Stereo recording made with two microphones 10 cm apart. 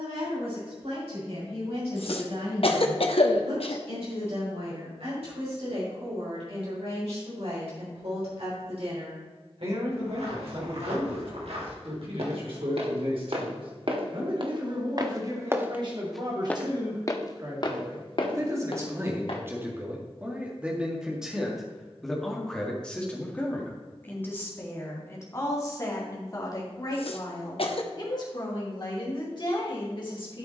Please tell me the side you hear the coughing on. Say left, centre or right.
left.